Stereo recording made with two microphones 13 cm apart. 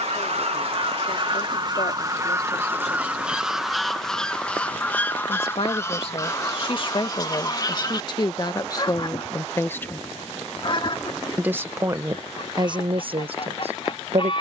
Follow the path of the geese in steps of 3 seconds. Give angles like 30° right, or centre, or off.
40° right, 10° left, 30° left, 40° left, 50° left.